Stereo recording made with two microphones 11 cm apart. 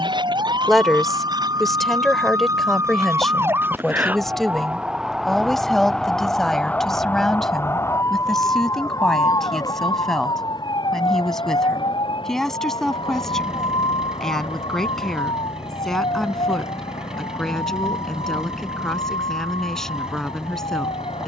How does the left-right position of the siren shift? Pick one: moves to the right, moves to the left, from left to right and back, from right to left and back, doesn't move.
moves to the left.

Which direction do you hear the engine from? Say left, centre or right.
centre.